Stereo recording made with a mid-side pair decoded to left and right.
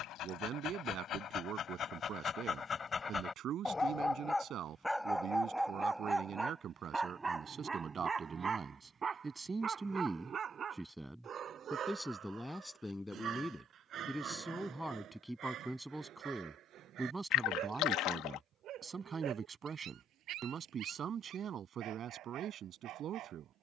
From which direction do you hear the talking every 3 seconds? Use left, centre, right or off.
right, right, right, centre, centre, centre, right, right.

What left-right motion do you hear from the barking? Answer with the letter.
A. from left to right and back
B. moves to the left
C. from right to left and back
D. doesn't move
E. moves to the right
E.